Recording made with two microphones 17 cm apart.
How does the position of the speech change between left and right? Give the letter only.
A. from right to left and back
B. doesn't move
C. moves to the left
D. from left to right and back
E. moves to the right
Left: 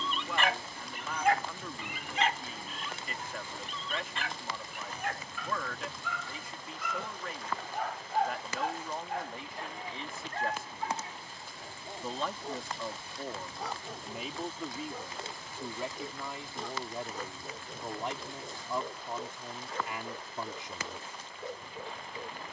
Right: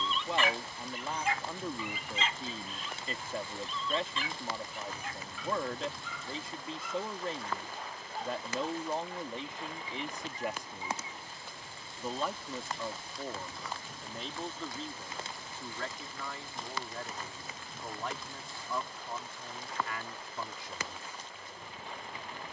C.